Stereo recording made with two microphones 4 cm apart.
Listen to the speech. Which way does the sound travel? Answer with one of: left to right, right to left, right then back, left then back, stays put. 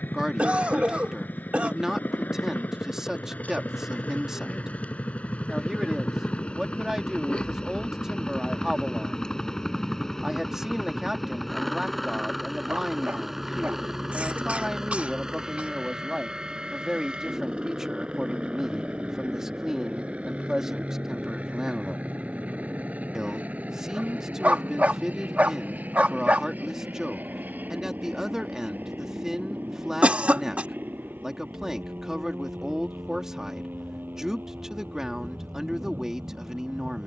stays put.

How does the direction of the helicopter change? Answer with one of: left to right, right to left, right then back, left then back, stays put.
left to right.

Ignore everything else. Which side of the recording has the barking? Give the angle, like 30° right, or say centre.
40° right.